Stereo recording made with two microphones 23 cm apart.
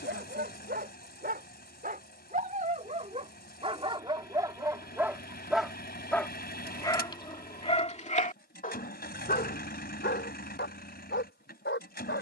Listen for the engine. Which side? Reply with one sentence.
In this clip you hear the engine on the left.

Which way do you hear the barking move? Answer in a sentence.
In this clip you hear the barking go from the right side to the left.